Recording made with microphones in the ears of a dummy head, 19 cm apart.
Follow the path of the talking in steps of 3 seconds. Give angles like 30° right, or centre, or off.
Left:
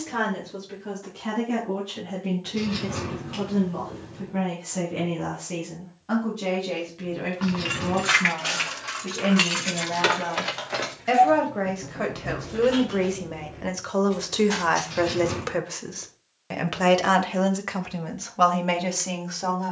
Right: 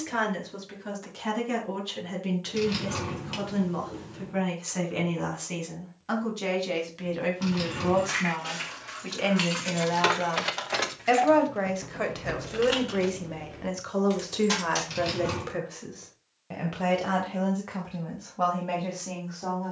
60° right, 50° right, 50° right, 30° right, centre, 50° left, 70° left.